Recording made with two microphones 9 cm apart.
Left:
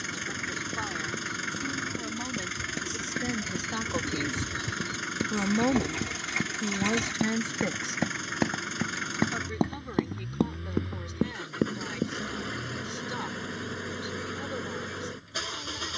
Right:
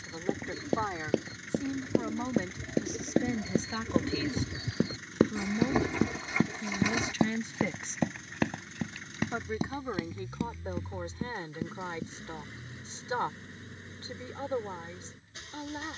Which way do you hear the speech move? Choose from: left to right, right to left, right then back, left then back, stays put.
left then back.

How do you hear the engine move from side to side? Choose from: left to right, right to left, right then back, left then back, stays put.
stays put.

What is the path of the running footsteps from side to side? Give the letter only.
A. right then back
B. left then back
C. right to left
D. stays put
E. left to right
C.